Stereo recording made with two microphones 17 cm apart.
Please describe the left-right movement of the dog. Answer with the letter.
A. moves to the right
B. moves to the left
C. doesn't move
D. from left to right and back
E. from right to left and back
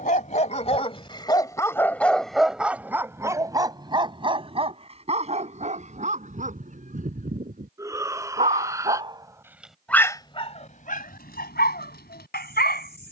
D.